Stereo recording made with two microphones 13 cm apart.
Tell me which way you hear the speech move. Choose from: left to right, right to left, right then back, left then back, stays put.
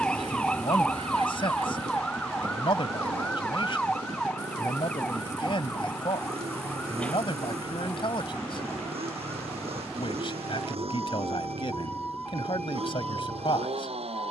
stays put.